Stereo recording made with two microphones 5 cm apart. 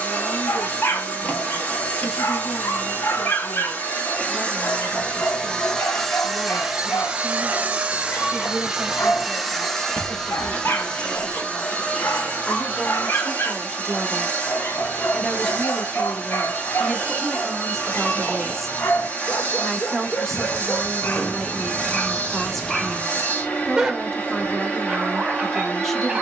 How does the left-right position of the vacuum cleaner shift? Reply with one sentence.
In this clip you hear the vacuum cleaner move from left to right and back again.